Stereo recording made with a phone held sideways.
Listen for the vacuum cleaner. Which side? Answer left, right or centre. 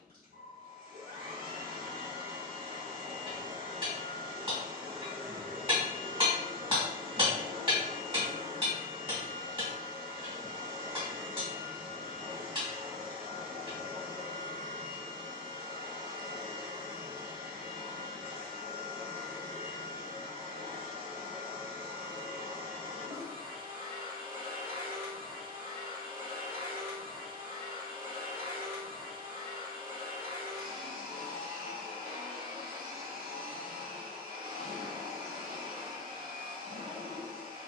right.